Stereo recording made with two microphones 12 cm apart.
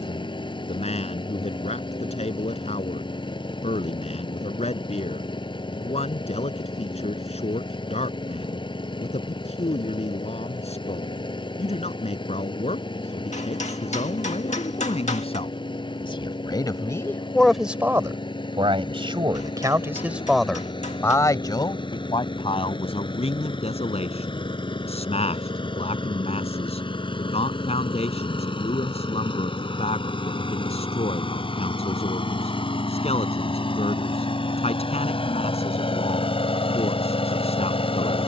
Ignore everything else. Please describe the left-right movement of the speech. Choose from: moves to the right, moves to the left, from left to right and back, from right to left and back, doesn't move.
from left to right and back.